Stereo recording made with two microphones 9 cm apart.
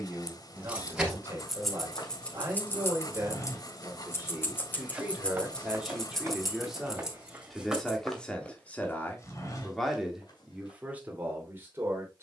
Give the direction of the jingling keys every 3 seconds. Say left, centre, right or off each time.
centre, left, centre, off.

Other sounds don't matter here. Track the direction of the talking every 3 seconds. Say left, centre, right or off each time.
right, right, centre, centre.